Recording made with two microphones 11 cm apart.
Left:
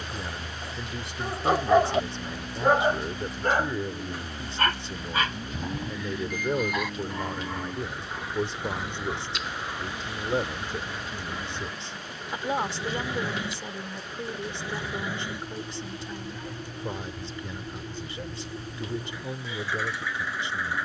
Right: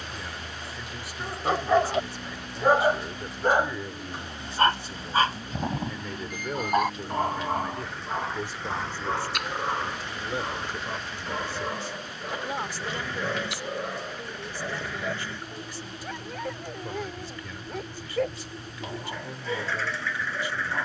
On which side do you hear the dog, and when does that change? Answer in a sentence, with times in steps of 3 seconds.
You can hear the dog in the centre from 0 s and on the right from 3 s.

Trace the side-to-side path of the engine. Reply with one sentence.
In this clip you hear the engine stay put.